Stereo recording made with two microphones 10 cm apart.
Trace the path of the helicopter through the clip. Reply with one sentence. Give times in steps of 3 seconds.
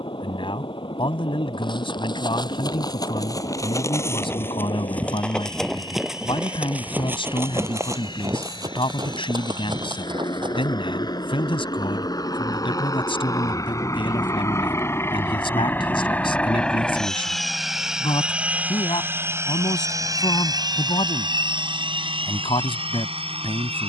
You can hear the helicopter on the left from 0 s, in the centre from 15 s and on the right from 18 s.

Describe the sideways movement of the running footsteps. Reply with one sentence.
You can hear the running footsteps move to the right.